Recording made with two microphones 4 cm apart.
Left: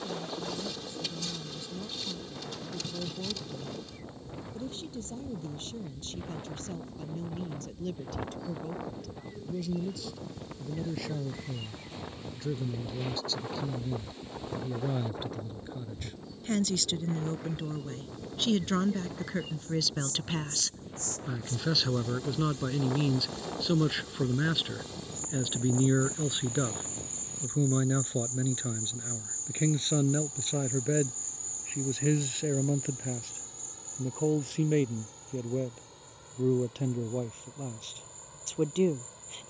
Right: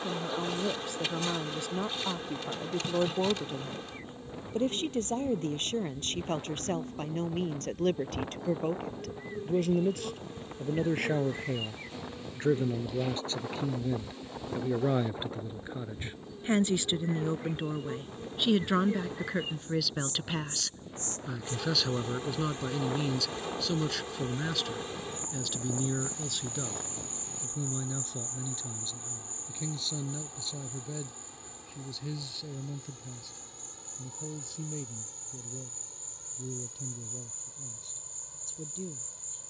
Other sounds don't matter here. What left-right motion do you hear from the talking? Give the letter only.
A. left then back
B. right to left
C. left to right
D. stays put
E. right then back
B.